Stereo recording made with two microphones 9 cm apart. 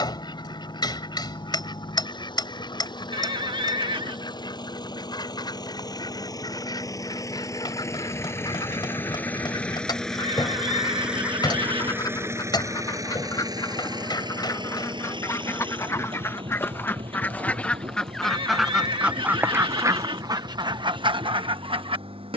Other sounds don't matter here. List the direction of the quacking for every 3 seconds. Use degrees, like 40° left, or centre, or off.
50° left, 50° left, 50° left, 50° left, 40° left, 20° left, 30° right, 70° right.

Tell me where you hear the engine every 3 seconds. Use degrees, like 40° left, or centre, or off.
60° left, 50° left, 30° left, centre, 40° right, 70° right, 80° right, 80° right.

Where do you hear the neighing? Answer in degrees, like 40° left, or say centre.
70° right.